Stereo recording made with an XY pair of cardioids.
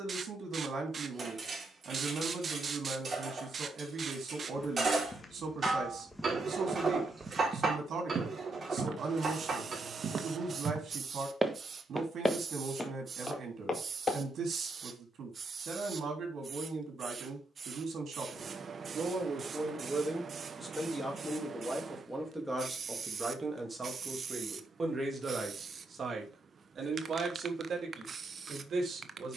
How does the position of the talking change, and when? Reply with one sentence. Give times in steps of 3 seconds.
In this clip you hear the talking on the right from 0 s, in the centre from 21 s and on the right from 24 s.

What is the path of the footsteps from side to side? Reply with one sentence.
You can hear the footsteps move from left to right and back again.